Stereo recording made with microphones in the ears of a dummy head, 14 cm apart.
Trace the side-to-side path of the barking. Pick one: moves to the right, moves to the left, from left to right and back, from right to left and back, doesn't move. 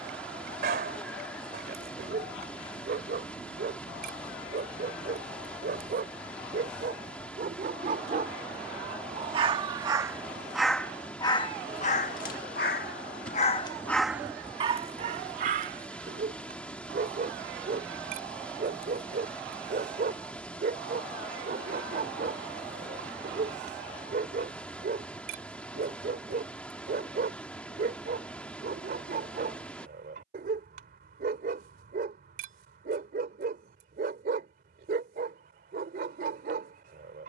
from right to left and back.